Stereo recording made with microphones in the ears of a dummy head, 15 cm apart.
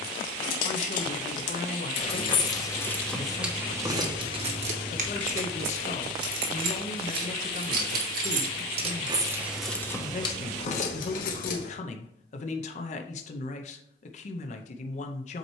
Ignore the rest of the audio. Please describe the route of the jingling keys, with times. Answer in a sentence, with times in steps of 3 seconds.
You can hear the jingling keys on the left from 0 s, on the right from 3 s, on the left from 9 s and not at all from 12 s.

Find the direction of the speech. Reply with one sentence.
In this clip you hear the speech on the left.